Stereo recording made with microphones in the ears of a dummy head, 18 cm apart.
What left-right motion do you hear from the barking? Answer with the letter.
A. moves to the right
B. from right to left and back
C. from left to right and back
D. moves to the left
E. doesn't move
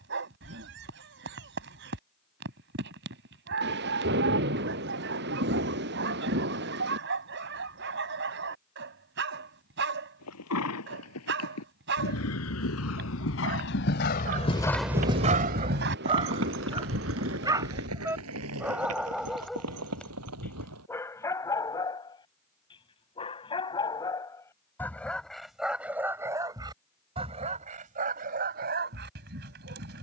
B.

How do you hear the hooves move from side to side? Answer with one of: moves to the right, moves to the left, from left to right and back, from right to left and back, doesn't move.
moves to the right.